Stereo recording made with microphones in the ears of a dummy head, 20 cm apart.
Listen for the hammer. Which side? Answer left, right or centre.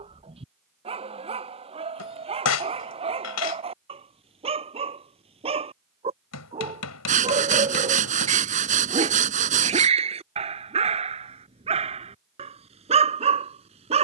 left.